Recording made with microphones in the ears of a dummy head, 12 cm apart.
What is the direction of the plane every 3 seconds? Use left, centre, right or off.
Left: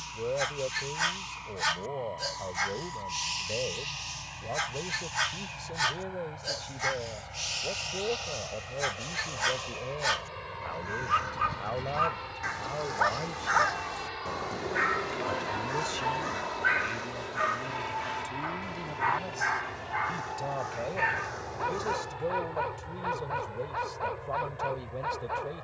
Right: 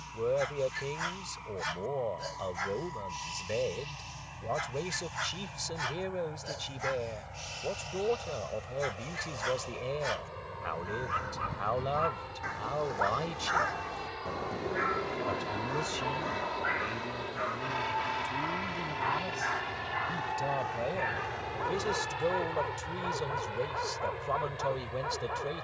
left, left, left, left, left, centre, right, right, right.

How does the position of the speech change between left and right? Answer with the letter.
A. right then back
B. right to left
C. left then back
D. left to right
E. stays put
C.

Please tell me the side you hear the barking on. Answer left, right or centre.
left.